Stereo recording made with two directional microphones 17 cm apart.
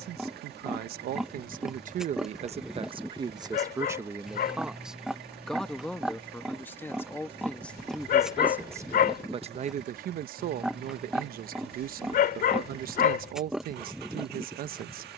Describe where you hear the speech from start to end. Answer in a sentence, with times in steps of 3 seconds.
You can hear the speech on the right from 0 s, in the centre from 3 s and on the right from 9 s.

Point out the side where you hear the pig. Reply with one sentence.
You can hear the pig in the centre.